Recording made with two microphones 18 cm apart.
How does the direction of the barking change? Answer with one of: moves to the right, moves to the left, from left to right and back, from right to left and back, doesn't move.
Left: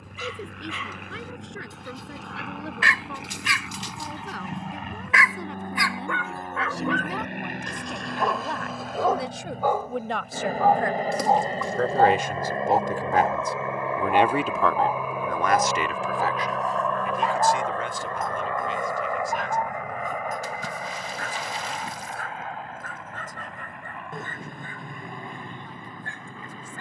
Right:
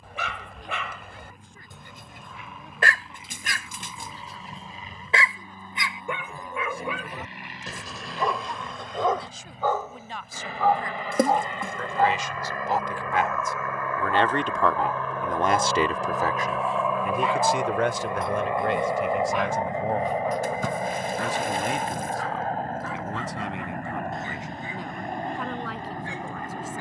moves to the left.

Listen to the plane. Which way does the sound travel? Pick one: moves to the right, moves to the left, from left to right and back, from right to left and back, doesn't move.
moves to the right.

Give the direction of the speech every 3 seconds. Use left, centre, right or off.
left, left, left, left, left, right, right, right, right.